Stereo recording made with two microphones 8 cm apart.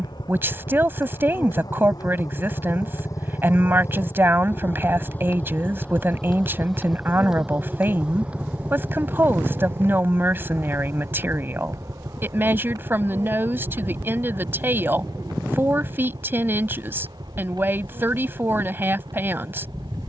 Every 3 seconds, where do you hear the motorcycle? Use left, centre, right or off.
left, left, centre, right, right, right, right.